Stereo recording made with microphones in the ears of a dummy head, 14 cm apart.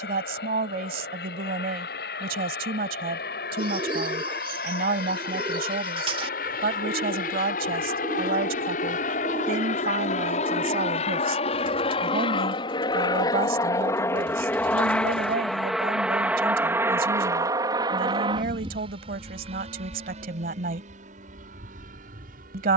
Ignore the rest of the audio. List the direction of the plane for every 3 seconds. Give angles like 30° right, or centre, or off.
70° left, 70° left, 60° left, 40° left, 20° left, 10° right, 40° right, 50° right.